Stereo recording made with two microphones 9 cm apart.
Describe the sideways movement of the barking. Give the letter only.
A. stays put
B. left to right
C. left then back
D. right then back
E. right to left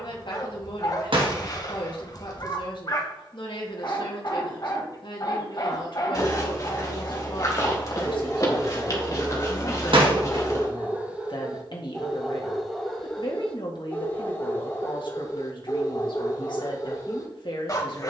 D.